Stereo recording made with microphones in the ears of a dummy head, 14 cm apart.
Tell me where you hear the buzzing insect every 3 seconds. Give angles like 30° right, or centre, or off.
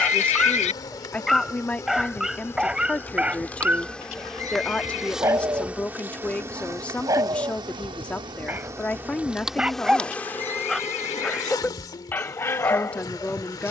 20° left, centre, 20° right, 10° left, 30° left.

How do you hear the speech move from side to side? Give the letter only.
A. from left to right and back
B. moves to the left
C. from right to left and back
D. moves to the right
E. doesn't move
E.